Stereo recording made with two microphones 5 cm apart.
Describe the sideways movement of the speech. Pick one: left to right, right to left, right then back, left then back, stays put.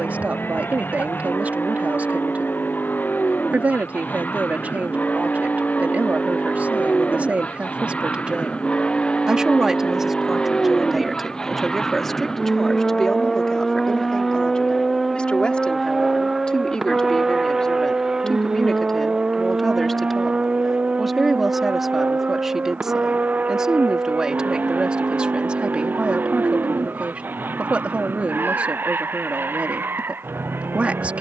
left then back.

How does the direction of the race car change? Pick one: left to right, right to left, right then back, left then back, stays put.
left to right.